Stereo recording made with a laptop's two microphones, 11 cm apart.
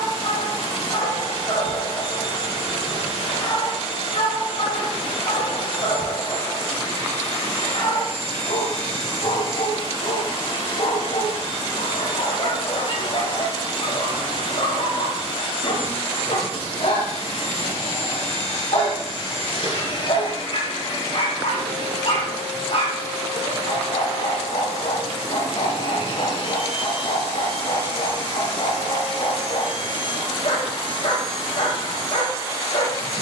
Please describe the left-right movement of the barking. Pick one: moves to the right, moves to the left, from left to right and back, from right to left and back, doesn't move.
doesn't move.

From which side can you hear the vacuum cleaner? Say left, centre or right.
left.